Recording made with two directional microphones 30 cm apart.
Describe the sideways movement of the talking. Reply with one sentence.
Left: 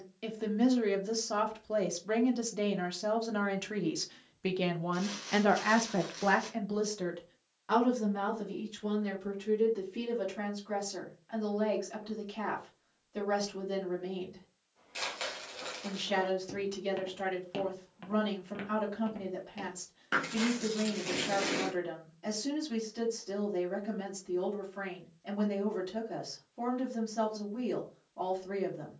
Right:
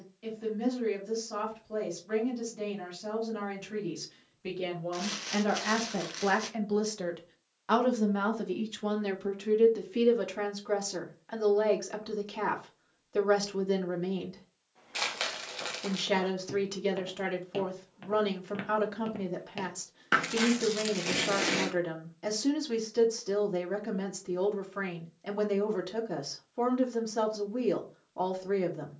In this clip you hear the talking move to the right.